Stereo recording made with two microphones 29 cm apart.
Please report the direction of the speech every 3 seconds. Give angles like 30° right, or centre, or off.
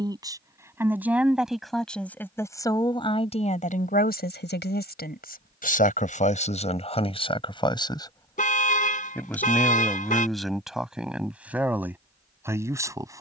centre, 30° left, 20° left, centre, 10° right.